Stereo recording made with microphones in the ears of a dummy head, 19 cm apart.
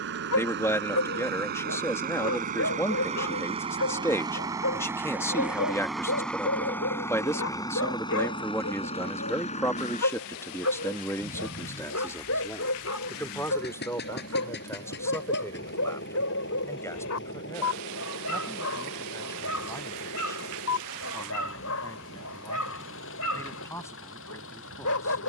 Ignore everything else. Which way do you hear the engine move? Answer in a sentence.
In this clip you hear the engine move from right to left.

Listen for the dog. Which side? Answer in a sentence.
In this clip you hear the dog on the left.